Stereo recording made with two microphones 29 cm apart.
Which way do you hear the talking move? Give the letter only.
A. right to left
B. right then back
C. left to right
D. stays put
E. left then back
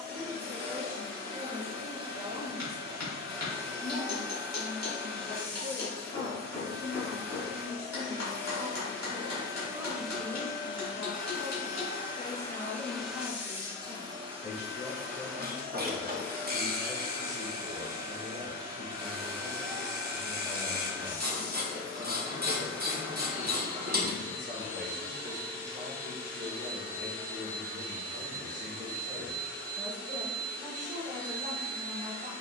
C.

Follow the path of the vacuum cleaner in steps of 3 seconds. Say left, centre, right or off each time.
right, right, right, centre, centre, right, right, right, right, right, right.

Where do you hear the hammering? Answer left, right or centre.
left.